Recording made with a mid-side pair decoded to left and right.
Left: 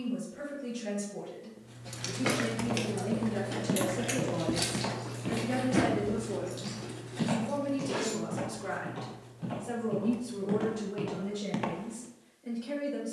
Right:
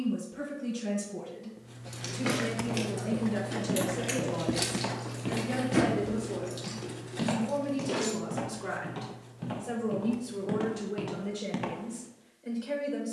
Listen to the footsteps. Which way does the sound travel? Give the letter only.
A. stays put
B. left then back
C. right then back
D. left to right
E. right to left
C.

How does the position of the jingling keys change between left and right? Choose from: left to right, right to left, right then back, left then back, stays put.
left to right.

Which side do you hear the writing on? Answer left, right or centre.
right.